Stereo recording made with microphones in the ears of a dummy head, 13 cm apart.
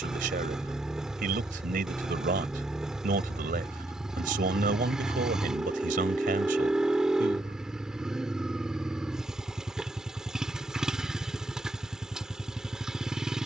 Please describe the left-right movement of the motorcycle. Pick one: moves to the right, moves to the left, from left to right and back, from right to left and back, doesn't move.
doesn't move.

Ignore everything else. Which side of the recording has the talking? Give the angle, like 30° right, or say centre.
70° right.